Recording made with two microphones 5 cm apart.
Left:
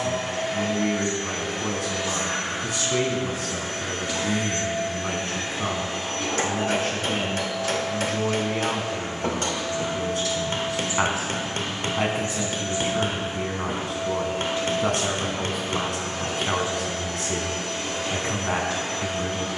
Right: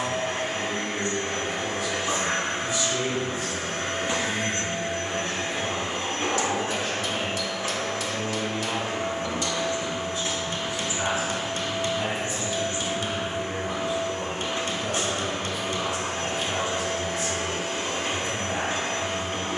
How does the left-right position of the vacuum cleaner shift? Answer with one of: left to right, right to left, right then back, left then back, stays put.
stays put.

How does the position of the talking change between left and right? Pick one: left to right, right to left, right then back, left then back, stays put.
stays put.